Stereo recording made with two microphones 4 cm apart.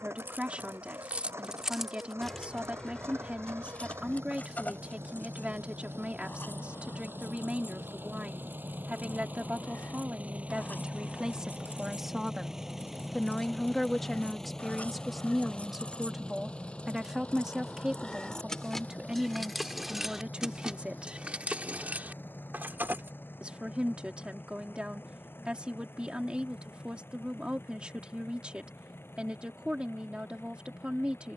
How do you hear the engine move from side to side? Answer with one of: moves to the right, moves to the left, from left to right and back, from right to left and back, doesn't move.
moves to the left.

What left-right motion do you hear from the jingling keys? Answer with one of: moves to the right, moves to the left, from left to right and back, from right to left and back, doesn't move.
from right to left and back.